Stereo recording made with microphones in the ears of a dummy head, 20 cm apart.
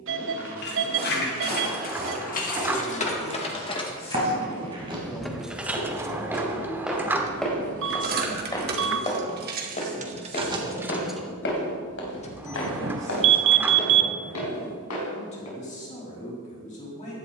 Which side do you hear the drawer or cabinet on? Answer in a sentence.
In this clip you hear the drawer or cabinet in the centre.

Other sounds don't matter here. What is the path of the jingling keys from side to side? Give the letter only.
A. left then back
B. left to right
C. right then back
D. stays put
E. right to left
C.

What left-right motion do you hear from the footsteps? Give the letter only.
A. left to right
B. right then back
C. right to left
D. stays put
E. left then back
C.